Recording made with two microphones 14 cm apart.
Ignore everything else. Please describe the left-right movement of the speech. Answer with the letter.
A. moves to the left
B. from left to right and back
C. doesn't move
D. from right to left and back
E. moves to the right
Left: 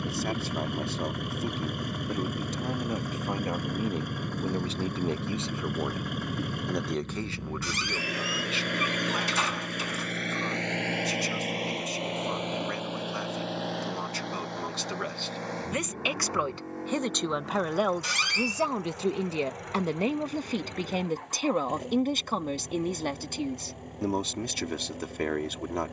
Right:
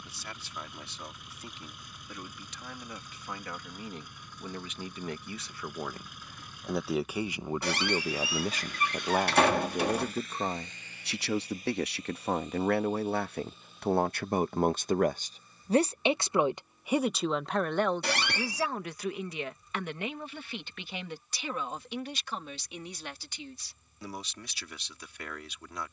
B.